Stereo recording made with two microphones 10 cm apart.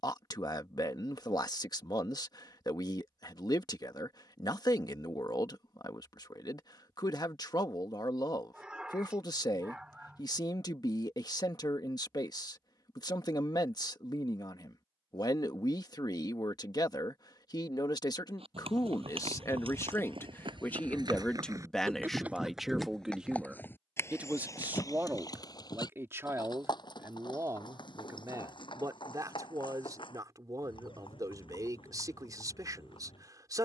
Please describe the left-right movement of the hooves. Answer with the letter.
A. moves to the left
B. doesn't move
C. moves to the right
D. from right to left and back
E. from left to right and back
A.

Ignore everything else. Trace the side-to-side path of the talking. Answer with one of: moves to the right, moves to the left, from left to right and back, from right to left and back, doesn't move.
moves to the right.